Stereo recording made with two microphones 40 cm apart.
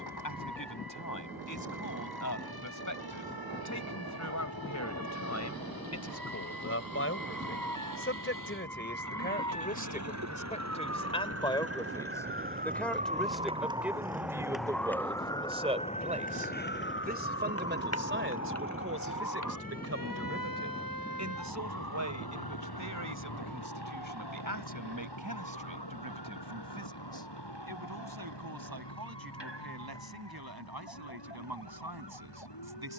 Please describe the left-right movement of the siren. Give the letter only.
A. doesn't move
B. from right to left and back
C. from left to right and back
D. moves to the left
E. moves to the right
D.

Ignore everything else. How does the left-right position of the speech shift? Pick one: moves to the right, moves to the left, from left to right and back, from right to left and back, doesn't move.
moves to the right.